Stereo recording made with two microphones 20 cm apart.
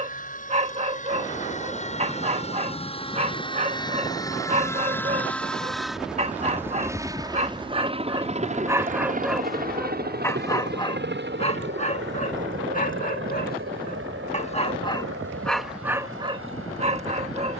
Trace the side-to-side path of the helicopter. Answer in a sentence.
In this clip you hear the helicopter travel towards the right.